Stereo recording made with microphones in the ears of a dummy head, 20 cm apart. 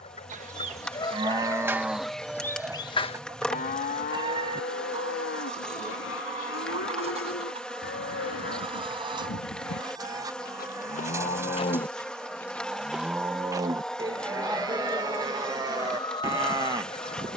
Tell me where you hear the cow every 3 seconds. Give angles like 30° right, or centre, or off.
10° right, 50° left, 60° left, 40° left, 10° right, 20° right.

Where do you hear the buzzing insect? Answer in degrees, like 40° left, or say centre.
centre.